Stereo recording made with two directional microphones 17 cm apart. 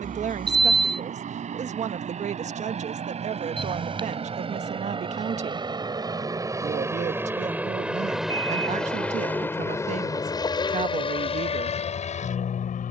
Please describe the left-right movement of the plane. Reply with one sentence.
In this clip you hear the plane go from the right side to the left.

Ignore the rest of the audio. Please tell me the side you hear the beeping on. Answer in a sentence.
In this clip you hear the beeping on the right.